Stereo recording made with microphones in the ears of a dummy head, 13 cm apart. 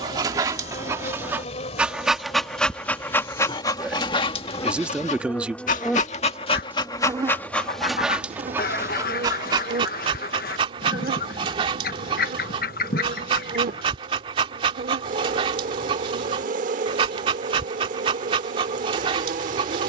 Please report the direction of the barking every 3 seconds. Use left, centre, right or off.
centre, left, centre, right, right, right, right.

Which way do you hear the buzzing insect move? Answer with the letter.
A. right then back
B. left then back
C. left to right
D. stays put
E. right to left
C.